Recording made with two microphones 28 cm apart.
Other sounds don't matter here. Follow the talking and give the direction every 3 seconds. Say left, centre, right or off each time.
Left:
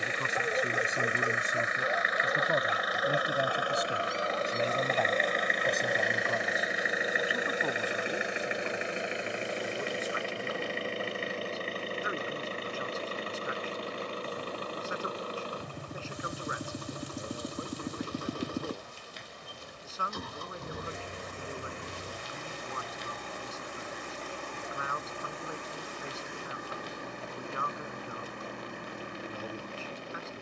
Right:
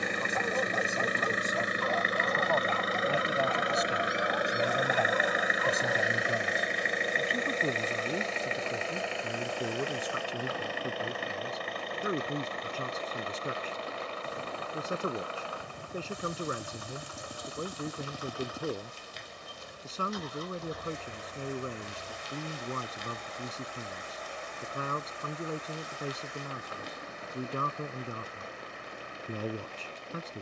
left, centre, right, right, right, right, right, right, right, right.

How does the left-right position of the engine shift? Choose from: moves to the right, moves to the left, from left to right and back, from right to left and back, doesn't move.
moves to the left.